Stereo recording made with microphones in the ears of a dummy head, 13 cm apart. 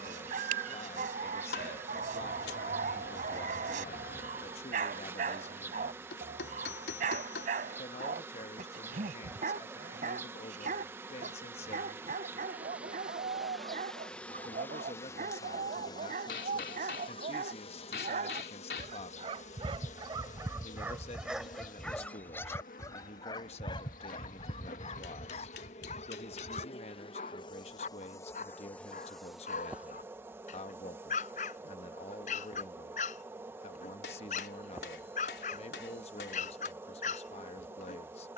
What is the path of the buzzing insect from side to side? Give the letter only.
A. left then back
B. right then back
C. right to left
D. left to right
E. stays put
A.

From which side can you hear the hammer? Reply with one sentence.
In this clip you hear the hammer on the left.